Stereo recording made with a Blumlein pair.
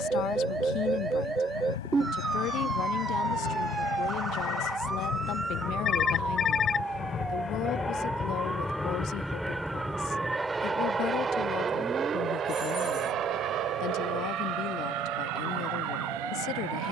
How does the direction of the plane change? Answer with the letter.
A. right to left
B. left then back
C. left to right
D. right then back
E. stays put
C.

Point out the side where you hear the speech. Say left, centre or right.
left.